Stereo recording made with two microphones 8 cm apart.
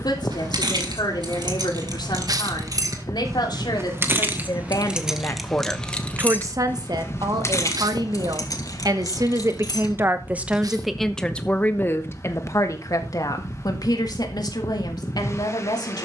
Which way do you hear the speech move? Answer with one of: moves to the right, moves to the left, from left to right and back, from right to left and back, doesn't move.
from left to right and back.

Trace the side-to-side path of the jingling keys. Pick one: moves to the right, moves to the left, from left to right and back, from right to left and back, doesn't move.
moves to the left.